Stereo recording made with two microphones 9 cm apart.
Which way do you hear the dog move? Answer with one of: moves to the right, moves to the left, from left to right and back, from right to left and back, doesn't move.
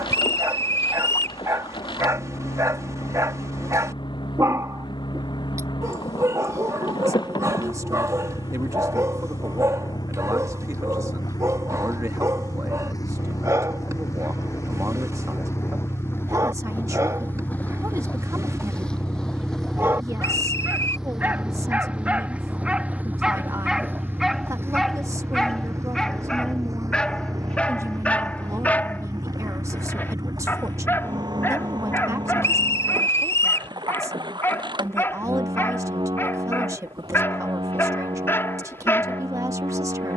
moves to the left.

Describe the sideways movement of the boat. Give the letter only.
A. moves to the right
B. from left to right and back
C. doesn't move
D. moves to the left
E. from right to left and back
A.